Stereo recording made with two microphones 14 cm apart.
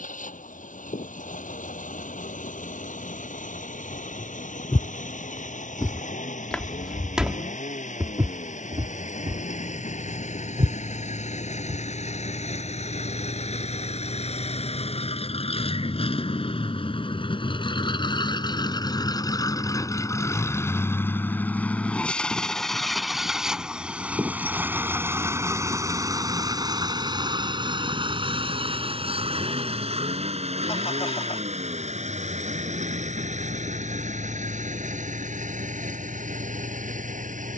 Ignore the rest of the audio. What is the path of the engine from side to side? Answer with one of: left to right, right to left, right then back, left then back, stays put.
left to right.